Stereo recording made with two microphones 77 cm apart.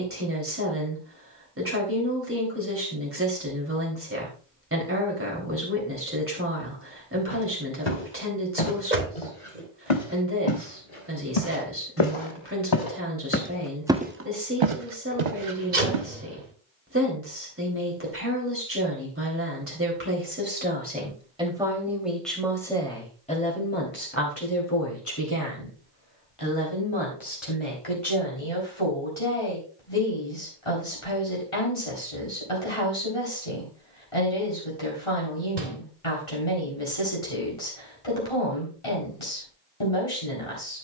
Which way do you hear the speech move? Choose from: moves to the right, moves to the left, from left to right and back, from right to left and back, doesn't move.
moves to the left.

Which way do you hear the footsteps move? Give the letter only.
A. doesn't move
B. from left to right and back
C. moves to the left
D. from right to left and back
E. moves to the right
E.